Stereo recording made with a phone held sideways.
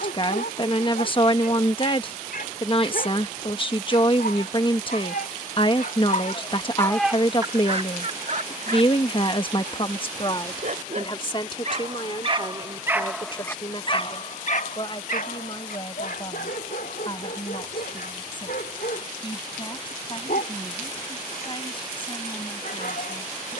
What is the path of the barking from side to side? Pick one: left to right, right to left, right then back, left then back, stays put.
right then back.